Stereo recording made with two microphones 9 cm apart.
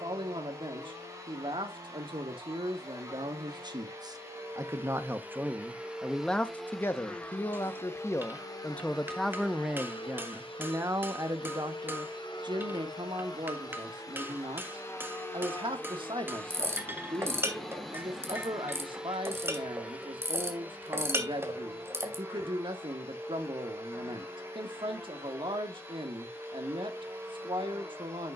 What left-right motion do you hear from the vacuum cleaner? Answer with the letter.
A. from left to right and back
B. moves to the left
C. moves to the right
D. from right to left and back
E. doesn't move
D.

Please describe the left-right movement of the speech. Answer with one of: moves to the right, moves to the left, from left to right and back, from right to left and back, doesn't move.
from right to left and back.